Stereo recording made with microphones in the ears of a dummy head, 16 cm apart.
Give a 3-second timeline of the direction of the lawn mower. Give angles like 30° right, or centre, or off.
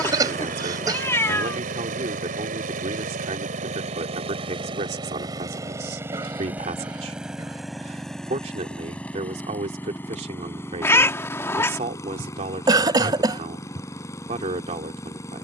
50° right, 30° right, centre, 10° left, 20° left.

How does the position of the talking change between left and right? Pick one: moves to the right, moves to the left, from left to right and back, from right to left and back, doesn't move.
doesn't move.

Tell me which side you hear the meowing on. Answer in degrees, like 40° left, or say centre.
10° left.